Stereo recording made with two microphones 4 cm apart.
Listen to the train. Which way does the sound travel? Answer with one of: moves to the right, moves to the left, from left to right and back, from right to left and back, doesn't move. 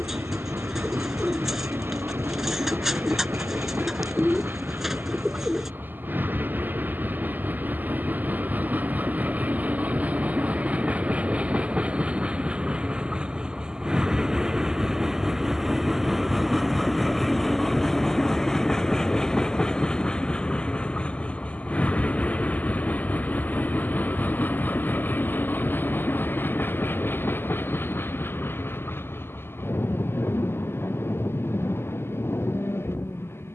moves to the left.